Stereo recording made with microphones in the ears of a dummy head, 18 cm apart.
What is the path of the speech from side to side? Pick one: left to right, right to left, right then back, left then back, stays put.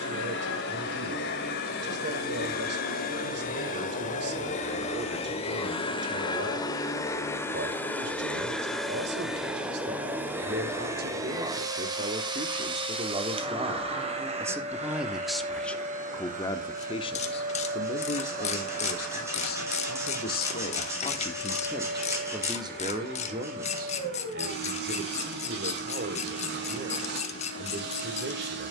left then back.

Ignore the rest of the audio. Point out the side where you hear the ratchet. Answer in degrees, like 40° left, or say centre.
30° left.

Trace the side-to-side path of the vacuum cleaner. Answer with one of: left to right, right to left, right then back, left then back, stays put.
left to right.